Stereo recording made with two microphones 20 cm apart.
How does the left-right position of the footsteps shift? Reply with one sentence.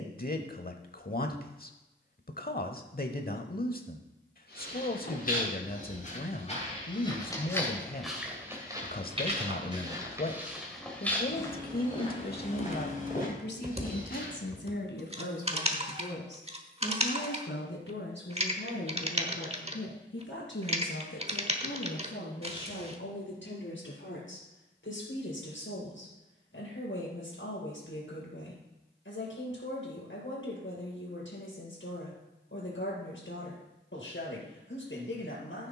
You can hear the footsteps go right and come back.